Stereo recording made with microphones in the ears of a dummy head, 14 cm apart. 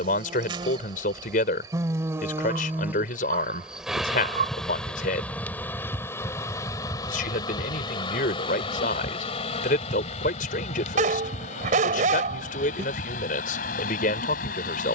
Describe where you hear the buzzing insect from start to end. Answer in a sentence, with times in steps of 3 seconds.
In this clip you hear the buzzing insect on the right from 0 s, in the centre from 3 s and on the left from 6 s.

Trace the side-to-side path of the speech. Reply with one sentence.
You can hear the speech stay put.